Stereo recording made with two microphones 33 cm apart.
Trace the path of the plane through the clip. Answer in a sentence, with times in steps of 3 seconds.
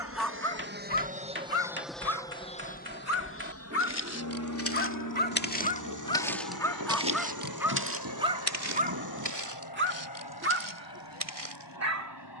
You can hear the plane in the centre from 0 s and on the left from 3 s.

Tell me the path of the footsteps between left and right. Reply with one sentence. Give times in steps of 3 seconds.
You can hear the footsteps not at all from 0 s, on the left from 3 s and on the right from 6 s.